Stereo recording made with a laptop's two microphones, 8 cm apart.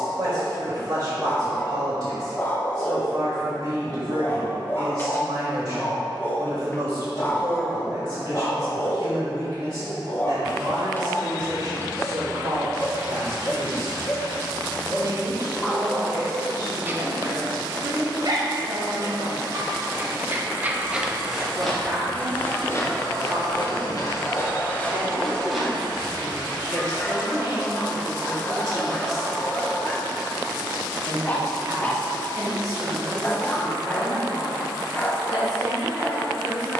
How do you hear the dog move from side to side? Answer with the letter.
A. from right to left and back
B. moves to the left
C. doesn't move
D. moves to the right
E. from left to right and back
E.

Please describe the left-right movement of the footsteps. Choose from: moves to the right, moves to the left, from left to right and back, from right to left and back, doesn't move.
from right to left and back.